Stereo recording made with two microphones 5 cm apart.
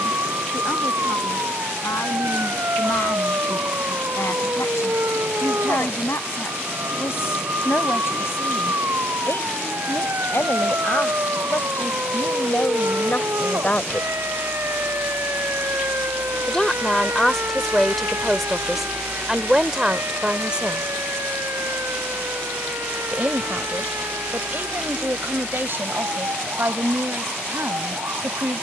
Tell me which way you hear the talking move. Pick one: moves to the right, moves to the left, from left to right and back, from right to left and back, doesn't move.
moves to the right.